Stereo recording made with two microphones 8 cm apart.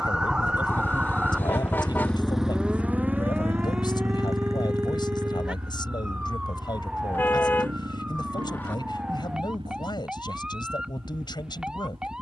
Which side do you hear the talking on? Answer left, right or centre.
left.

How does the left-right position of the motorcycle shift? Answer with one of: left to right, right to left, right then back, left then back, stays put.
left to right.